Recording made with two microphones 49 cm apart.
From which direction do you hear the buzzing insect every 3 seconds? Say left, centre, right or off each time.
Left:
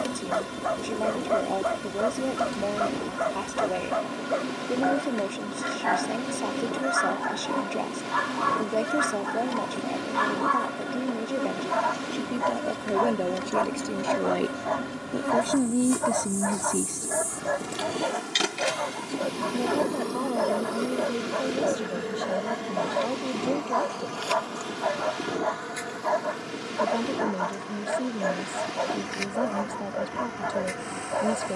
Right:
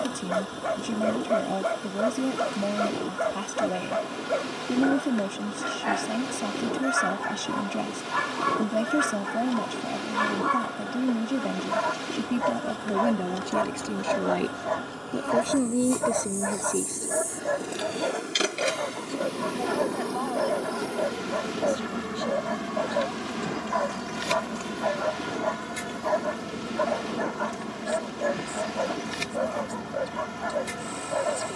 left, left, left, left, left, left, centre, right, right, right, right.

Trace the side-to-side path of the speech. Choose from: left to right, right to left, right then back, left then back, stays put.
right to left.